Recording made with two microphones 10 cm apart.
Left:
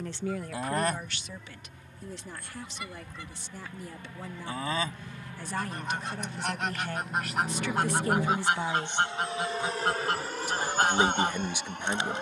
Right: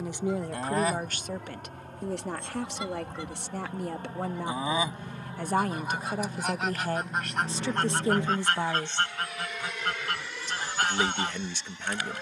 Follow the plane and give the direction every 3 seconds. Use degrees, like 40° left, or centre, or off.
60° right, 30° right, 10° left, 40° left.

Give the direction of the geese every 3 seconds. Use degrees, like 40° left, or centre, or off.
10° right, 10° right, centre, 20° left.